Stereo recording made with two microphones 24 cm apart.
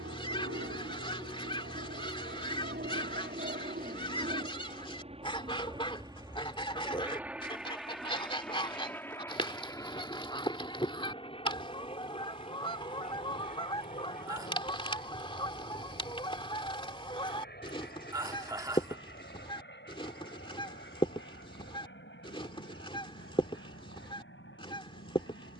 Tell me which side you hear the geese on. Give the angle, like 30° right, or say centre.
20° left.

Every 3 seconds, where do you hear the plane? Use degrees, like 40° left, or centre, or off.
50° right, 30° right, centre, 20° left, 30° left, 40° left, 40° left, 50° left, 50° left.